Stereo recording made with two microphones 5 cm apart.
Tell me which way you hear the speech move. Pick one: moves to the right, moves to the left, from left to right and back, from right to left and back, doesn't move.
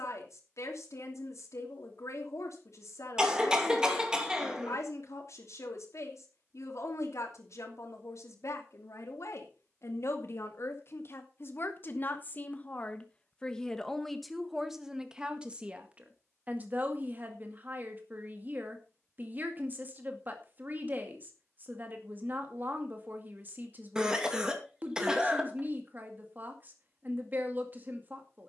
moves to the right.